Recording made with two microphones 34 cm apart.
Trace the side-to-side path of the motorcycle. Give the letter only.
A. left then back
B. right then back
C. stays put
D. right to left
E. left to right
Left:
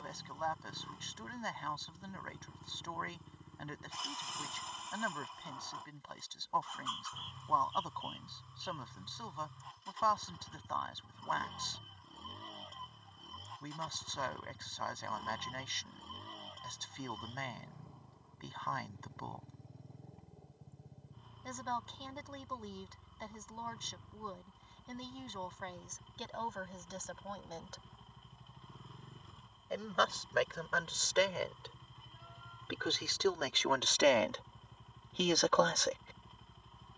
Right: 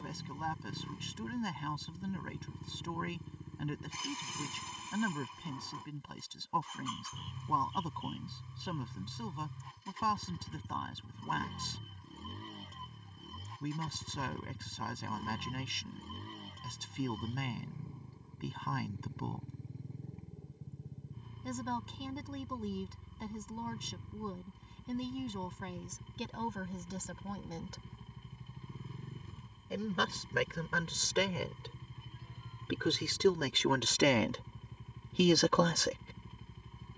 C.